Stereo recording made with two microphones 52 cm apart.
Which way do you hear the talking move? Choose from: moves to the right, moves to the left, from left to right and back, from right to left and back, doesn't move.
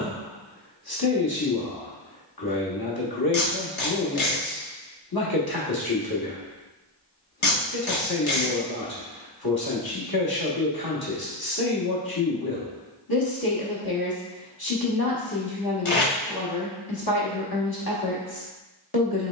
doesn't move.